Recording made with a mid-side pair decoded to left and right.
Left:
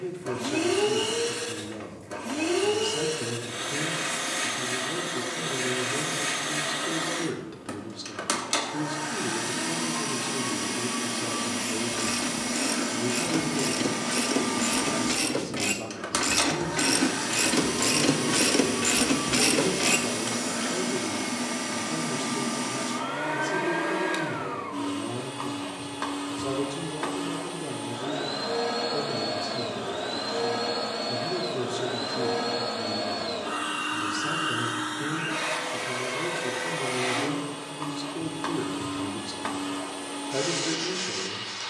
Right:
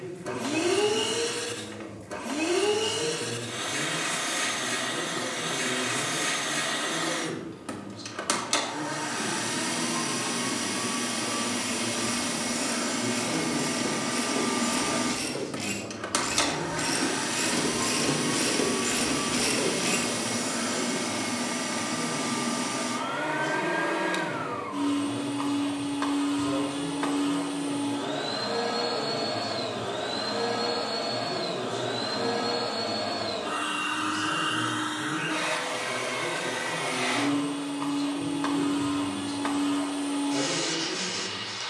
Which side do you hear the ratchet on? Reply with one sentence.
In this clip you hear the ratchet on the left.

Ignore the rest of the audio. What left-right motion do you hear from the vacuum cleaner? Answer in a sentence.
You can hear the vacuum cleaner stay put.